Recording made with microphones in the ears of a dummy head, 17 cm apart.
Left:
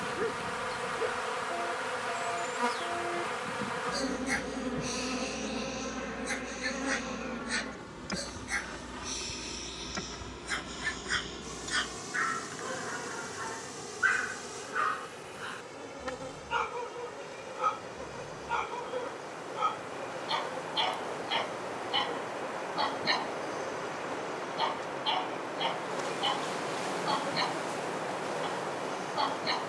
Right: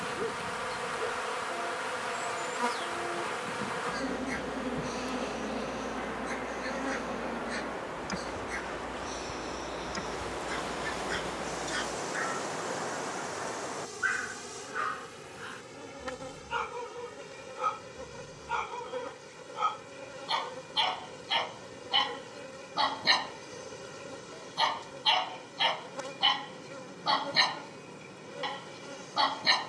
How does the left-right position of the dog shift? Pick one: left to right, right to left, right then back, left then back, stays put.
left to right.